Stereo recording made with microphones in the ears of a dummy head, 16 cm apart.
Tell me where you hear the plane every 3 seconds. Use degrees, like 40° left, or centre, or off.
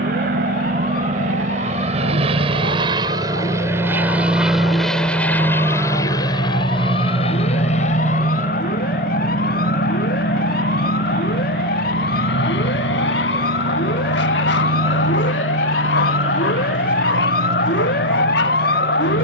40° right, centre, 30° left, 50° left, 60° left, 70° left, 70° left.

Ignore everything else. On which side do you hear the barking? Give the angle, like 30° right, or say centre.
70° left.